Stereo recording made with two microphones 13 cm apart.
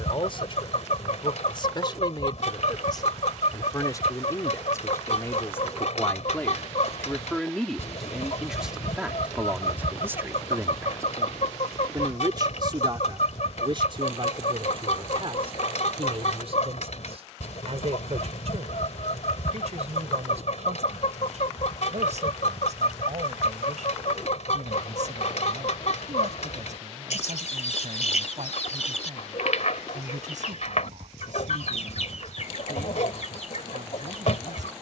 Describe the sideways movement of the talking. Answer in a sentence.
You can hear the talking move to the right.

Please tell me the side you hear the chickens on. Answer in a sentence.
In this clip you hear the chickens on the left.